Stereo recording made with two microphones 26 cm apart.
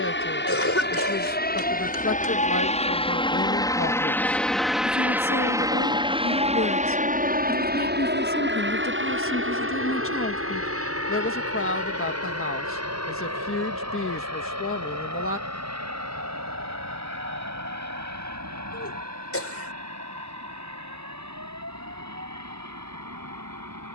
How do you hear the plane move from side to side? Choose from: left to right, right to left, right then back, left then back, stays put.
left to right.